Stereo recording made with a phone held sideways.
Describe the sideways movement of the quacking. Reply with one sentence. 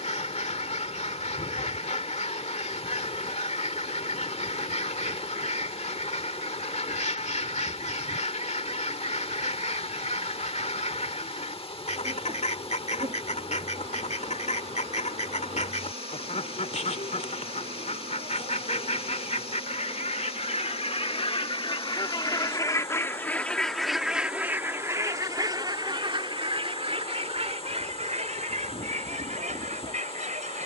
In this clip you hear the quacking go from the left side to the right.